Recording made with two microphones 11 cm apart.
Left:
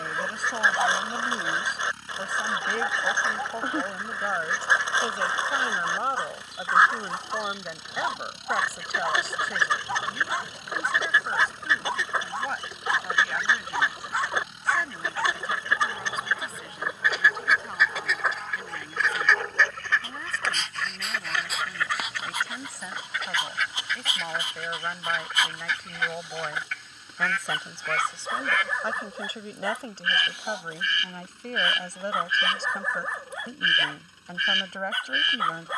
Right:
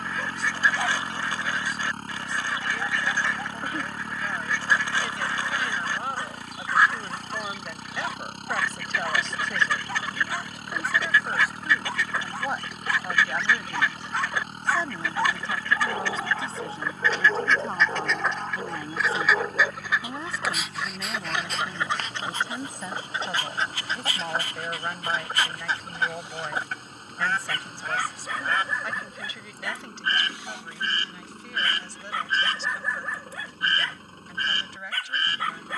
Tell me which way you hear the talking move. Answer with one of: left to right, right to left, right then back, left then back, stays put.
right then back.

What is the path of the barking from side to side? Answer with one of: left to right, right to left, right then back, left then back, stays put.
right then back.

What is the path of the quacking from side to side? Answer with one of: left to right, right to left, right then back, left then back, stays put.
left to right.